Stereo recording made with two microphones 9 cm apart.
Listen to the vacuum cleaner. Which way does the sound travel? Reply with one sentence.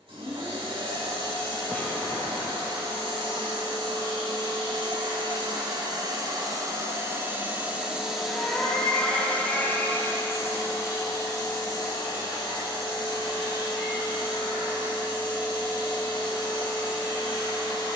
In this clip you hear the vacuum cleaner move to the left.